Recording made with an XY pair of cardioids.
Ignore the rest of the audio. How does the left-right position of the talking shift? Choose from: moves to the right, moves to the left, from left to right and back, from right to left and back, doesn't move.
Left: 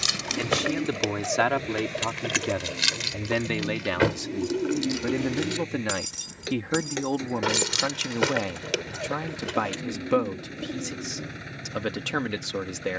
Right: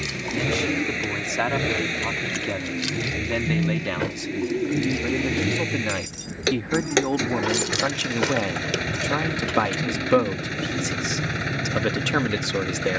moves to the right.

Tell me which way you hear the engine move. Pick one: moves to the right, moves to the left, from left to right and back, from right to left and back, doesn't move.
doesn't move.